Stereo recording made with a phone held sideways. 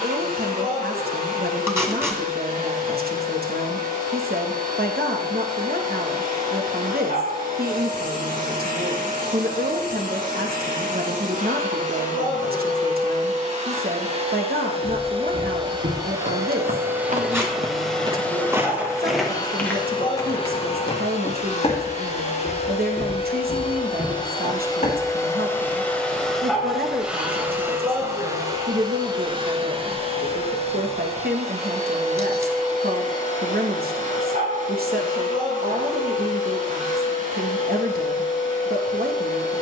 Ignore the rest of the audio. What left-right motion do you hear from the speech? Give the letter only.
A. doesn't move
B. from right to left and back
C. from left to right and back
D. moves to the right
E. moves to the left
A.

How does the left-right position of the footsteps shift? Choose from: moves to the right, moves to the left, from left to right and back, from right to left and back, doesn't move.
moves to the left.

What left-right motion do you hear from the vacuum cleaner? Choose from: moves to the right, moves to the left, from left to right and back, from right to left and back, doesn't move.
from right to left and back.